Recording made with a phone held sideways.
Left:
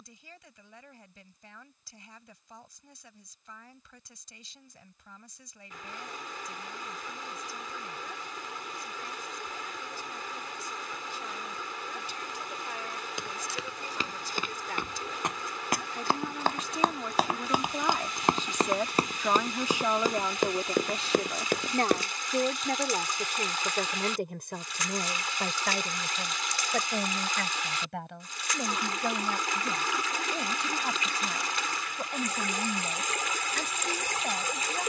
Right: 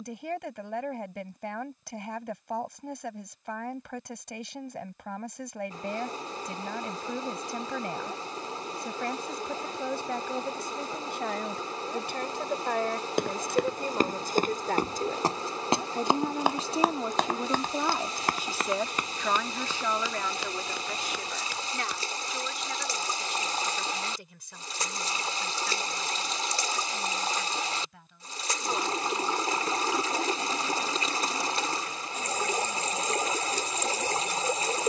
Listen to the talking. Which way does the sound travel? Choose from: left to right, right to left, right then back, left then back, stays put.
right to left.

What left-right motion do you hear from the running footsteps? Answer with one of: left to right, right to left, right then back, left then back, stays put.
right to left.